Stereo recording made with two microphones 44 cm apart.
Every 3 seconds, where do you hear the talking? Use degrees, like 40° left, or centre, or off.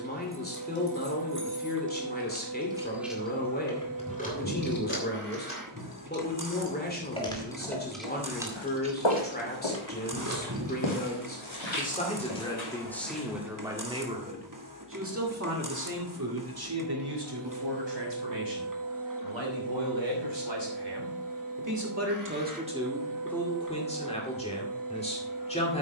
20° left, 20° left, 20° left, 20° left, centre, 50° right, 70° right, 10° right, 10° left.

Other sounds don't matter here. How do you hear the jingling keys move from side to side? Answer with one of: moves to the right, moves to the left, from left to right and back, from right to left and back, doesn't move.
from right to left and back.